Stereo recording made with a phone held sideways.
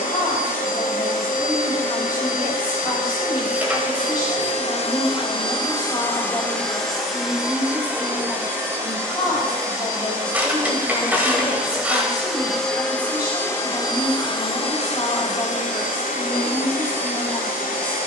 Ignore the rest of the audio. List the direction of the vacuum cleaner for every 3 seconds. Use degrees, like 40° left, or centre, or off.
70° left, 50° left, centre, 20° right, 20° left, 60° left.